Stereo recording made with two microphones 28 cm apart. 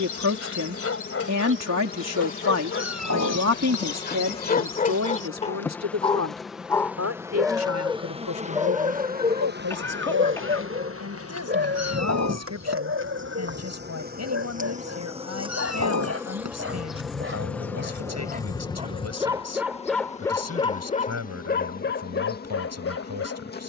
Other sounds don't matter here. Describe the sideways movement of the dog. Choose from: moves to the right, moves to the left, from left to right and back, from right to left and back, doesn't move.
from left to right and back.